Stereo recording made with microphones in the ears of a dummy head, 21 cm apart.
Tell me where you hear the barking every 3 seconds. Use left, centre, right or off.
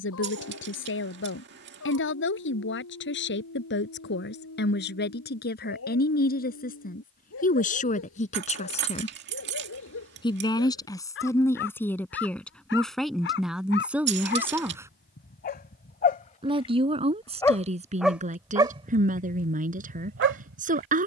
left, left, left, left, left, left, right.